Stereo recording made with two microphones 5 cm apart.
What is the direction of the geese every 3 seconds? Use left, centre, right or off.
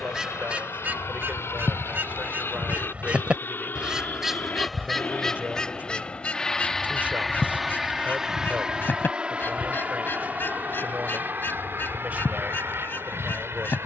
right, centre, left, left, left.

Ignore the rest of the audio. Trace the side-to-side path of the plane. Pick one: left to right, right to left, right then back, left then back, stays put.
left to right.